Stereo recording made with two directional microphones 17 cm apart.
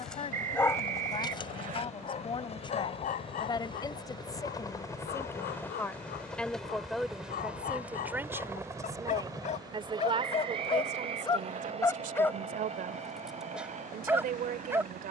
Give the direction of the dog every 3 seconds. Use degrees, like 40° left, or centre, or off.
30° left, 60° left, 60° left, 30° left, centre.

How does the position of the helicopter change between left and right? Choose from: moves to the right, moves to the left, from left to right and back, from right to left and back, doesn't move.
moves to the right.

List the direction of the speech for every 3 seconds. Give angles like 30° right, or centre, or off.
30° left, 20° left, 10° right, 40° right, 60° right.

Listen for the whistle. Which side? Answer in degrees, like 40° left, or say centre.
50° right.